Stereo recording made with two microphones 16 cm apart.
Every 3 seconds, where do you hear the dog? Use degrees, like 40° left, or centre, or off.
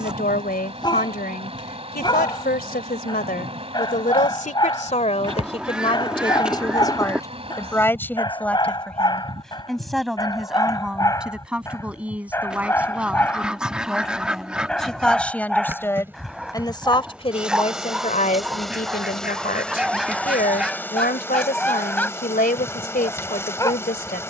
30° left, 30° left, 30° left, 20° left, 10° left, centre, centre, 10° left.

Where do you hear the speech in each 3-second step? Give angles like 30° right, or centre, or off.
80° left, 50° left, 20° left, centre, 10° right, 30° left, 70° left, 70° left.